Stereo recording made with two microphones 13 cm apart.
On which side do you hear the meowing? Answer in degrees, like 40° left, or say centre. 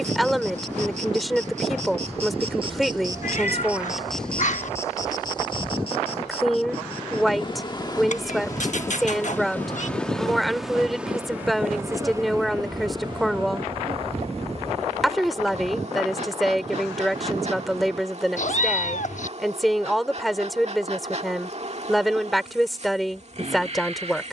60° left.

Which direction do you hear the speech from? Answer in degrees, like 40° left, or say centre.
centre.